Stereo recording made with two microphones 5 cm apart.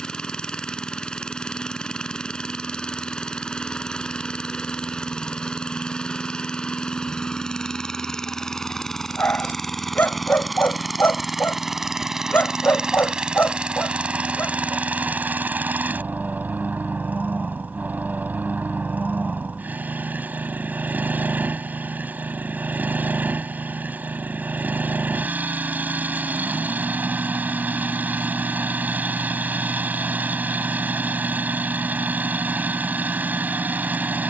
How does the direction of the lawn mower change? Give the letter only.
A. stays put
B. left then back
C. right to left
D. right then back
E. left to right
E.